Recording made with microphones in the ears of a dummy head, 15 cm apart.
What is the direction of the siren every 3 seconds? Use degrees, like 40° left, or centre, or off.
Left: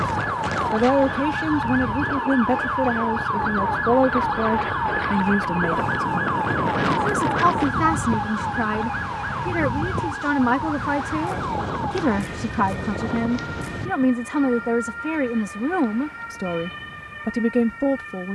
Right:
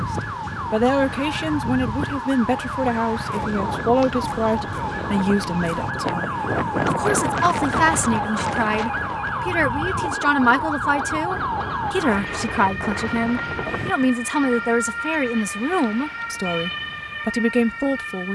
60° left, 30° left, centre, 30° right, 40° right, 50° right.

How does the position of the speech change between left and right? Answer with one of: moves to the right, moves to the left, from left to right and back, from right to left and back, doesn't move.
doesn't move.